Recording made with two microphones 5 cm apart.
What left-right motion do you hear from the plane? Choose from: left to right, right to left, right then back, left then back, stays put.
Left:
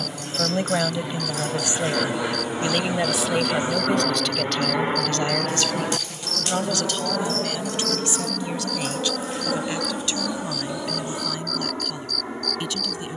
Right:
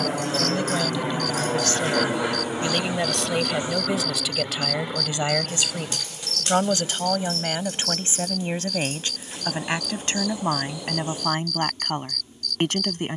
right to left.